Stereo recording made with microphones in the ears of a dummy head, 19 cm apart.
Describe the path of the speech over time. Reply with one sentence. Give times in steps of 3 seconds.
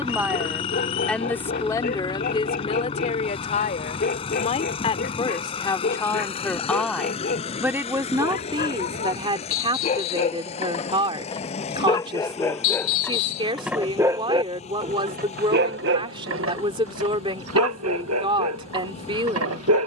In this clip you hear the speech in the centre from 0 s, on the left from 3 s, in the centre from 6 s and on the right from 9 s.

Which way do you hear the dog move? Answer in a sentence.
In this clip you hear the dog move to the right.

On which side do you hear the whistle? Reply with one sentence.
You can hear the whistle on the left.